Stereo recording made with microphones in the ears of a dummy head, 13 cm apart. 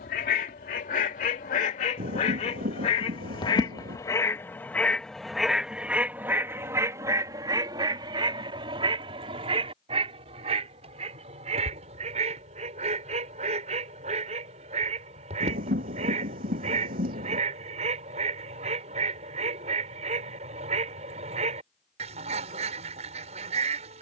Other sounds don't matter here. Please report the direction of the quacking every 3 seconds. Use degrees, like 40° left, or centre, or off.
60° left, 20° left, 30° right, 50° right, 50° right, 50° right, 50° right, 50° right.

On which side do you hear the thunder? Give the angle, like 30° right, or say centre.
70° right.